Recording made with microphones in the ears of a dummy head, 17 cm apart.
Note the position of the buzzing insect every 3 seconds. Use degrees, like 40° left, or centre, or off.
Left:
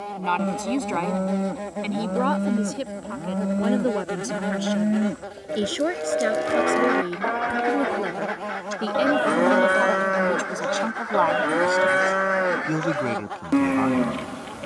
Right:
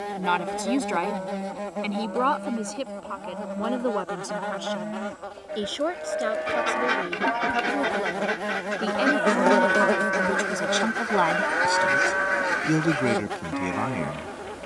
centre, 20° left, 10° right, 20° right, 30° right.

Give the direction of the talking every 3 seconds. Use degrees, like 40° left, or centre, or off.
centre, 20° left, 20° left, 10° right, 10° right.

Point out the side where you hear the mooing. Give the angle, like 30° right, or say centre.
50° left.